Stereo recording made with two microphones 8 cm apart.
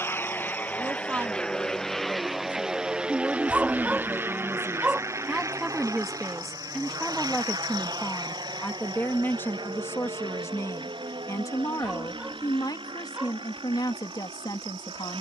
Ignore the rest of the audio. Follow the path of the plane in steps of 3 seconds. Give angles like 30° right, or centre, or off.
10° left, 30° right, 50° right, 60° right, 70° right.